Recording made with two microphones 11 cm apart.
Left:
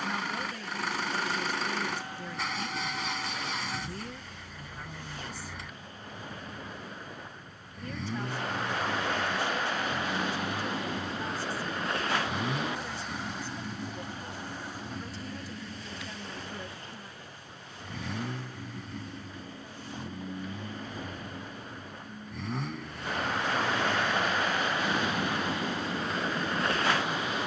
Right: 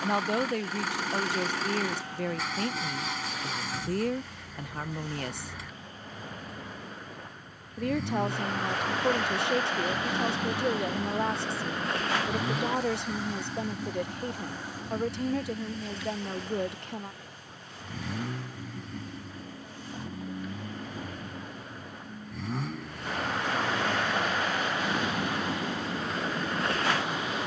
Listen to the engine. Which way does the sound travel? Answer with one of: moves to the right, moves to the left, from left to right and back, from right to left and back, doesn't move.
doesn't move.